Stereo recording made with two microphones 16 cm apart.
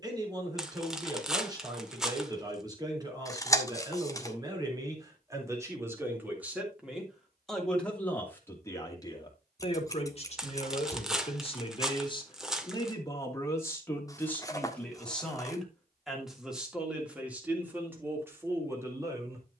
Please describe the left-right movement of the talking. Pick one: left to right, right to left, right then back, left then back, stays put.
left then back.